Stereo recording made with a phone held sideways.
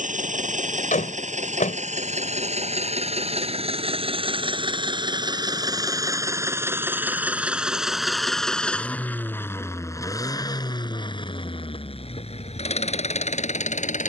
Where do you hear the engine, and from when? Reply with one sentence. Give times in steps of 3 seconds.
You can hear the engine on the right from 0 s, in the centre from 6 s and on the left from 9 s.